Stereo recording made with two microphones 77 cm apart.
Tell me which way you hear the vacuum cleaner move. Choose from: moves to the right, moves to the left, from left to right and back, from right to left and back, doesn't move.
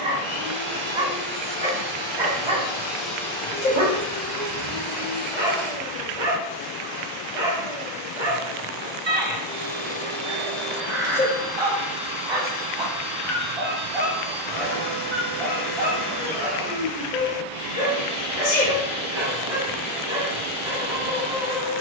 from right to left and back.